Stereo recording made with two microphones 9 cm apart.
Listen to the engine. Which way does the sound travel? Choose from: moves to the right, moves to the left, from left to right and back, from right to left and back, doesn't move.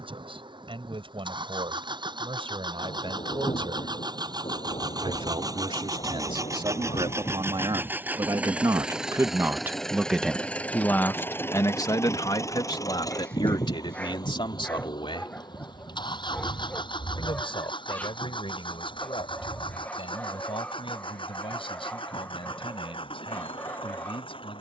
moves to the left.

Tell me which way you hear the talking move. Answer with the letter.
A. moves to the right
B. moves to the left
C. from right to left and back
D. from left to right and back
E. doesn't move
B.